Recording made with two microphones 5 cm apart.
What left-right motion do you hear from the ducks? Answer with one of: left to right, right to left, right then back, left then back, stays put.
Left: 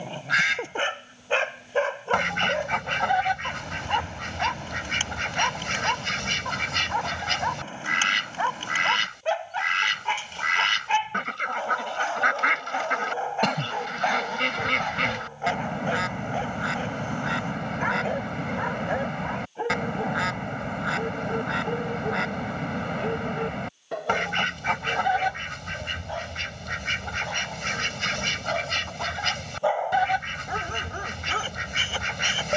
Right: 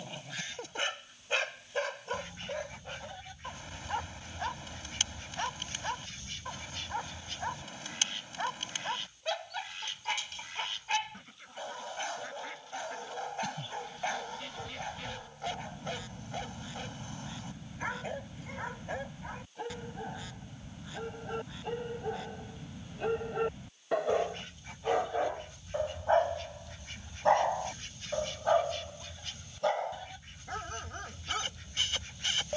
stays put.